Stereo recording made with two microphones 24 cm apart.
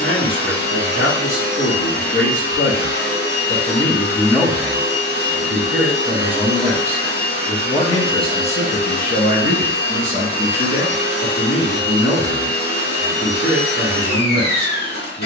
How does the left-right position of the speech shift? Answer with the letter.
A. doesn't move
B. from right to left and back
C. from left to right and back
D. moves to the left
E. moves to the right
C.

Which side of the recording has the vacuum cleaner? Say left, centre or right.
left.